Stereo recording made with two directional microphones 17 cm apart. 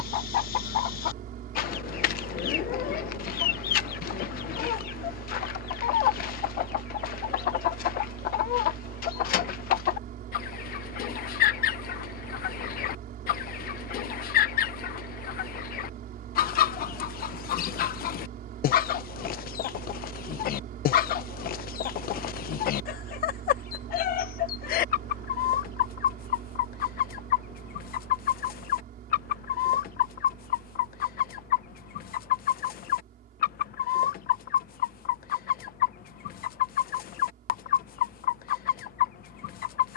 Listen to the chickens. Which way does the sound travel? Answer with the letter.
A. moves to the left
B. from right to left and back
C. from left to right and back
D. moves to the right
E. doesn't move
E.